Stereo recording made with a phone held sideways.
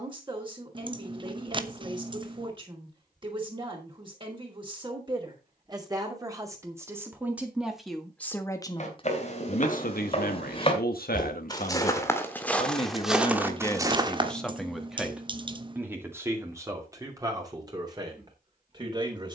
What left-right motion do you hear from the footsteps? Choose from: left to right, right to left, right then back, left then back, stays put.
left to right.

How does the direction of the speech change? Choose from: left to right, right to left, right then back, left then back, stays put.
left then back.